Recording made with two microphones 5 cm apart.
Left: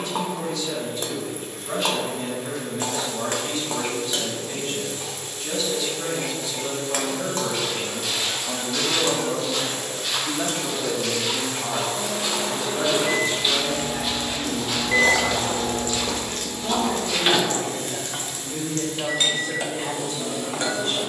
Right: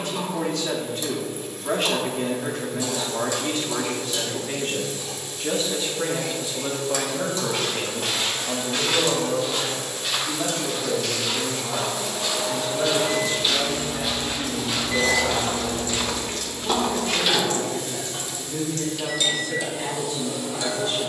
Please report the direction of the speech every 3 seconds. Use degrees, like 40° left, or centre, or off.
50° right, 50° right, 10° right, 30° left, 50° left, 60° left, 60° left.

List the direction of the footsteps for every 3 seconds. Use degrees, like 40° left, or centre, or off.
off, off, 40° right, centre, centre, 30° right, off.